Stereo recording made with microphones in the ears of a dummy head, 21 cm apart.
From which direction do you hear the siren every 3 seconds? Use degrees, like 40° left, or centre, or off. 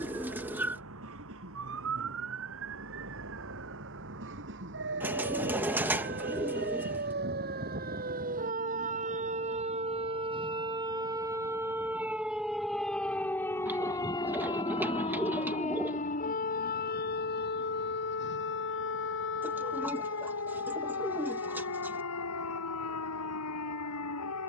60° right, 50° right, 40° right, 20° right, 10° left, 40° left, 50° left, 60° left.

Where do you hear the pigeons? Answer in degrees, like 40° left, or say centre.
10° right.